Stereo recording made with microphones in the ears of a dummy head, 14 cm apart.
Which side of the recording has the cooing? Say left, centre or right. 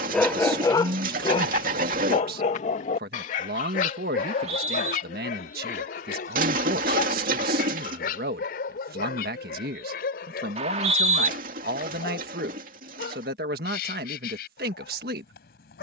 right.